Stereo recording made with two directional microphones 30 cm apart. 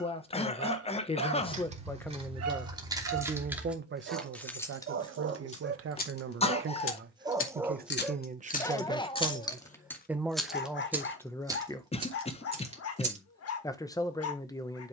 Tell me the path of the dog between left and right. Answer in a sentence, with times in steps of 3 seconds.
You can hear the dog on the right from 0 s, in the centre from 6 s and on the left from 9 s.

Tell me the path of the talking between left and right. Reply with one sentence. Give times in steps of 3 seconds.
You can hear the talking in the centre from 0 s, on the right from 3 s and in the centre from 9 s.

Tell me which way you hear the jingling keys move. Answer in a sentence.
In this clip you hear the jingling keys go left and come back.